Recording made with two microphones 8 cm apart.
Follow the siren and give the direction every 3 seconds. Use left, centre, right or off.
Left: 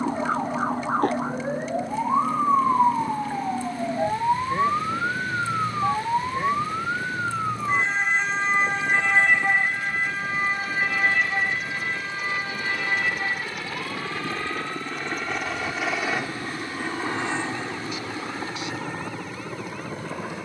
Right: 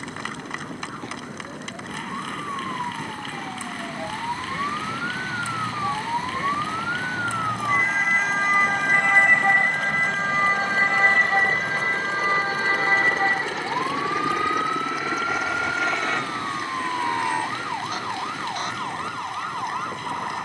left, left, centre, right, right, right, right.